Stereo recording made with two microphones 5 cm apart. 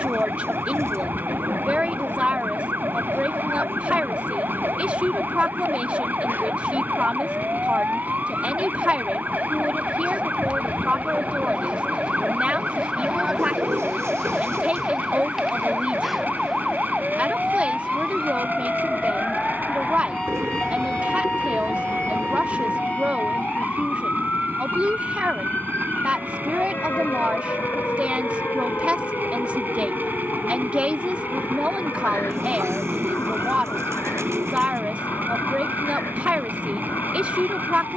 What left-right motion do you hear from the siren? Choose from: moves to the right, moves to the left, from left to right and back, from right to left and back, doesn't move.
moves to the left.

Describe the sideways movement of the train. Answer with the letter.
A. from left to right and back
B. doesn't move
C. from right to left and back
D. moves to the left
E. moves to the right
B.